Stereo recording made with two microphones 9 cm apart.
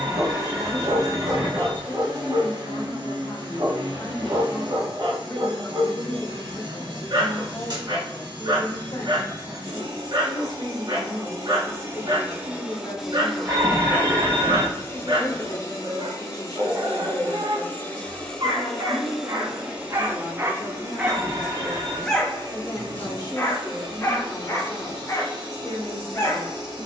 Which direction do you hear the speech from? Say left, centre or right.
left.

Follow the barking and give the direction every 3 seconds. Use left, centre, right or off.
right, right, right, right, right, right, right, centre, left.